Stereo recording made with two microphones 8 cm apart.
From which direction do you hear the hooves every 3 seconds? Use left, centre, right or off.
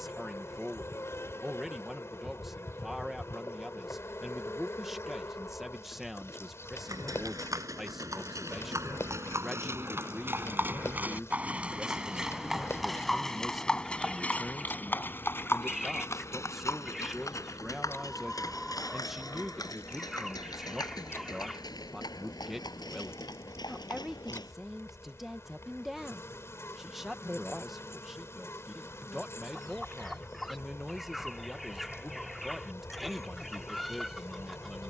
off, off, right, right, centre, left, left, left, left, off, off, off.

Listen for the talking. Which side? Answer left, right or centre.
centre.